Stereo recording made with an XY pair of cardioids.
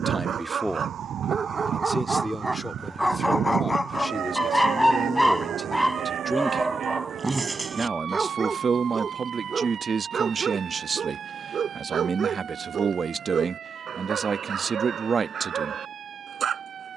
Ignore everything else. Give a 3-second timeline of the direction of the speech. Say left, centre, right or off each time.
centre, centre, right, right, right, right.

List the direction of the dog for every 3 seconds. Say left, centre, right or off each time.
right, centre, right, right, right, right.